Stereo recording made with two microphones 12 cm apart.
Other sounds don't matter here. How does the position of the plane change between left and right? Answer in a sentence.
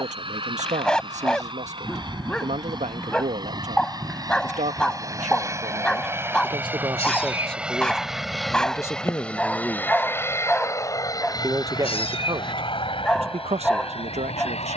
In this clip you hear the plane move from right to left.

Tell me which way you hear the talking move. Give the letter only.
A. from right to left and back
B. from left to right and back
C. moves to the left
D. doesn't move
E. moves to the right
A.